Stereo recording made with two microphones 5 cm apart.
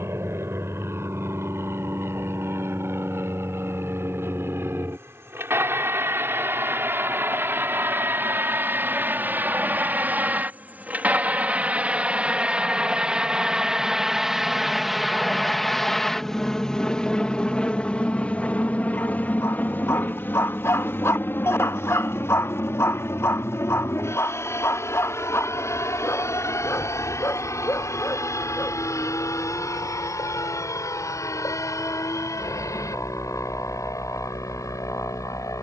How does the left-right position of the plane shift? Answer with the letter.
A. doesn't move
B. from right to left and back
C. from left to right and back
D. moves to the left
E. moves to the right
D.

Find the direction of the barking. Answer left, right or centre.
left.